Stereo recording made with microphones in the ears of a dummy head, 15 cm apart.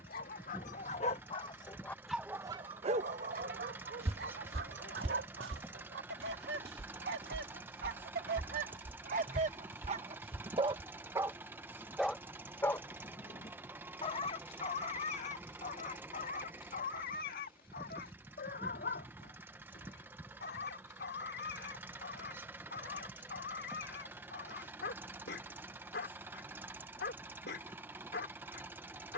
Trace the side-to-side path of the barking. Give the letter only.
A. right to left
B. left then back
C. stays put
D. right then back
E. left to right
D.